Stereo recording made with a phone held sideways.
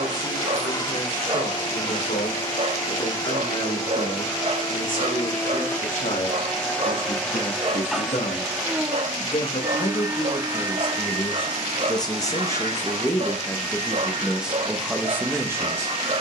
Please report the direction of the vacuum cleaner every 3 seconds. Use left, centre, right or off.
left, left, centre, right, right, right.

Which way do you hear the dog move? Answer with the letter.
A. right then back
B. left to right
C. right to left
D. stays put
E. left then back
D.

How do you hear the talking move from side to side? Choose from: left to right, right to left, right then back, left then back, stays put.
left to right.